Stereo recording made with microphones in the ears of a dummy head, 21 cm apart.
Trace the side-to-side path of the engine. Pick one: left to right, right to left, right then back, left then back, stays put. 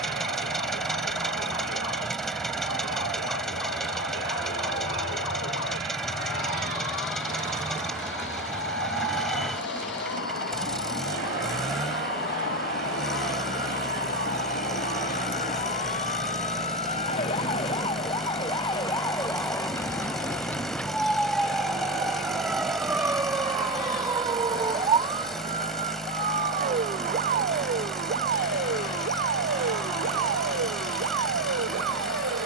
stays put.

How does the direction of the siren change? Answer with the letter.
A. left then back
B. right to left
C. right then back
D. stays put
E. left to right
E.